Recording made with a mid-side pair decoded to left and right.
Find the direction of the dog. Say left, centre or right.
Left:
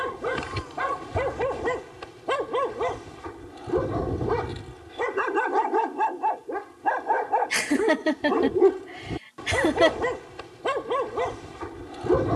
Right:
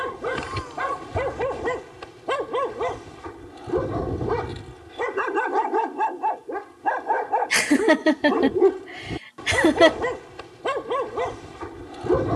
centre.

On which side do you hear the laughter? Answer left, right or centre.
right.